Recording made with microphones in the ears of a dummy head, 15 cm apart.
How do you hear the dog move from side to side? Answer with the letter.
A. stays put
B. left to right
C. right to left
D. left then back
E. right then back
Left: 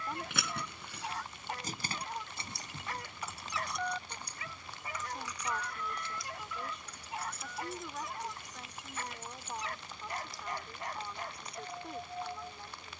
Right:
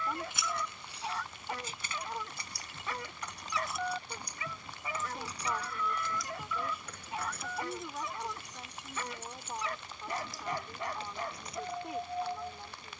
A.